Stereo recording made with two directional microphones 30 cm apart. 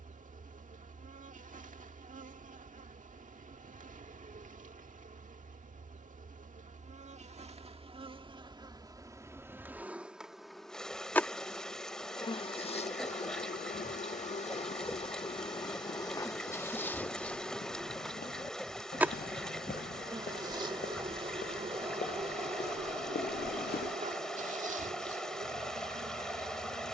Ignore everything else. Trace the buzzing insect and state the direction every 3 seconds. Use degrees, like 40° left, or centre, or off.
30° right, 30° right, 20° right, centre, 20° left, 10° left, 10° right, 20° right, 20° right.